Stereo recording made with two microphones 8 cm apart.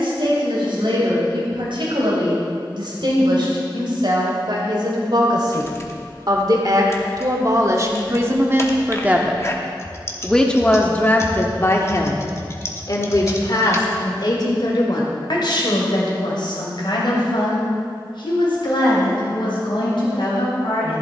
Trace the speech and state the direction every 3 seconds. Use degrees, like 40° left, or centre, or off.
70° right, 70° right, 40° right, 10° left, 50° left, 60° left, 70° left.